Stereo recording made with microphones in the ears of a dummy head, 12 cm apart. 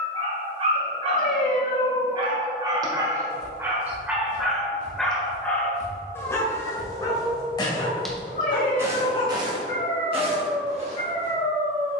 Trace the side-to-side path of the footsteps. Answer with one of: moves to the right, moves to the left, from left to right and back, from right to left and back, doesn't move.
moves to the right.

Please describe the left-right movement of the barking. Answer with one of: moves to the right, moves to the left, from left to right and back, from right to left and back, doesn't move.
moves to the left.